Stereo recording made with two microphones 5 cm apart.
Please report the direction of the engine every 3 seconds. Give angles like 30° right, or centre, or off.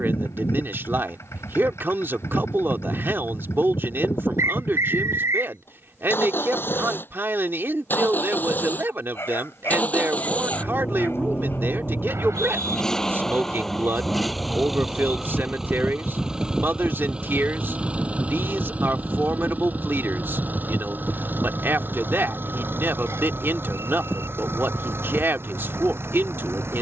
60° left, 50° left, 40° left, 20° left, 10° left, 10° right, 30° right, 40° right, 50° right.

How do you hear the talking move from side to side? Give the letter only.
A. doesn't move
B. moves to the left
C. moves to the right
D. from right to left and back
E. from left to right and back
A.